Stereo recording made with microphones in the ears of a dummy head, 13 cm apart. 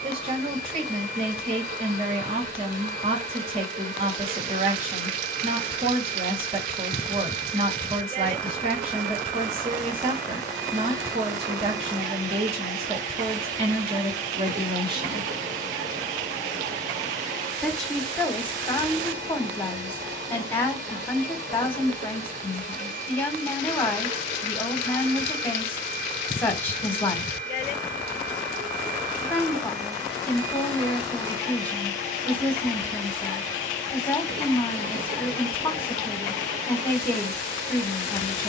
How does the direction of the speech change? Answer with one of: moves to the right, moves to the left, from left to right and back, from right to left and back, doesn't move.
moves to the left.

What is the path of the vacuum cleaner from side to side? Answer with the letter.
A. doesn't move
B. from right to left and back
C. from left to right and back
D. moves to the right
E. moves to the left
A.